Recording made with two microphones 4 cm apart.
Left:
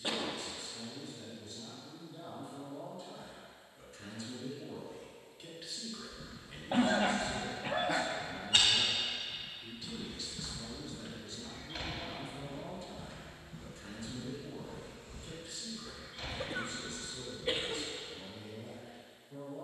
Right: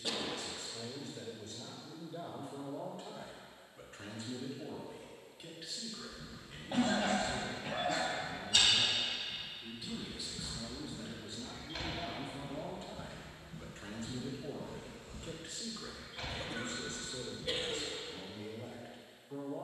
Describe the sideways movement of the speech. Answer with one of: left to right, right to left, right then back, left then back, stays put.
left then back.